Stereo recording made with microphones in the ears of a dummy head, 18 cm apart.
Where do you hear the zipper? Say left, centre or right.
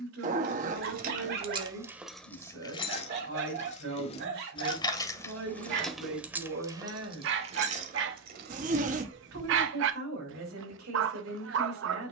right.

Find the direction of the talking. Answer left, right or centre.
right.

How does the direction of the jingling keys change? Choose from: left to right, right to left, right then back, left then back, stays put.
left then back.